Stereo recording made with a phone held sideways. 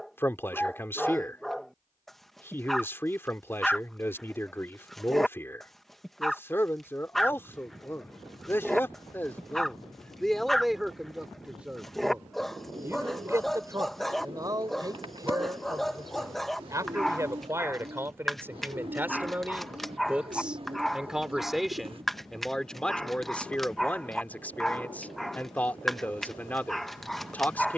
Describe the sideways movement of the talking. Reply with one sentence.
In this clip you hear the talking go right and come back.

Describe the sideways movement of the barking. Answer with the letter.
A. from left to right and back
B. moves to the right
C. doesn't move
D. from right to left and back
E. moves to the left
C.